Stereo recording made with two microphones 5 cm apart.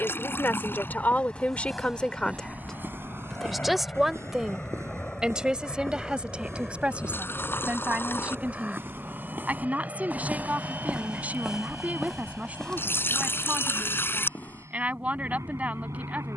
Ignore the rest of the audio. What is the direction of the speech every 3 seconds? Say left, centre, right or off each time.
left, centre, right, right, right, right.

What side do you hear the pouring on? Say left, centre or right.
left.